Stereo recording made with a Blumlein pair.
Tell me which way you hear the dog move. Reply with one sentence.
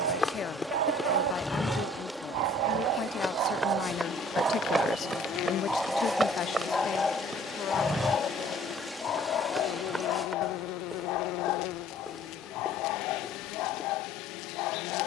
You can hear the dog go from the right side to the left.